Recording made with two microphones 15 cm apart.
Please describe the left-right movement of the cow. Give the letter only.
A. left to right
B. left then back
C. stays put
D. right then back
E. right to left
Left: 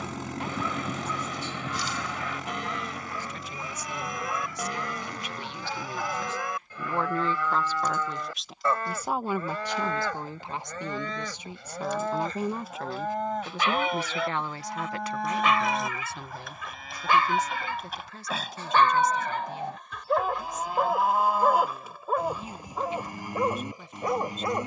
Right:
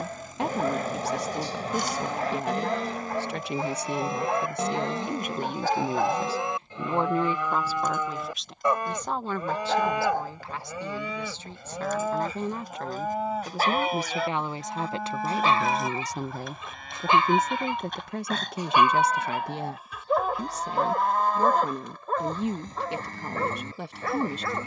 E.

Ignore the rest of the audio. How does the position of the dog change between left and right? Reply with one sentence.
In this clip you hear the dog travel towards the left.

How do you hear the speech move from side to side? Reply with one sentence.
In this clip you hear the speech go left and come back.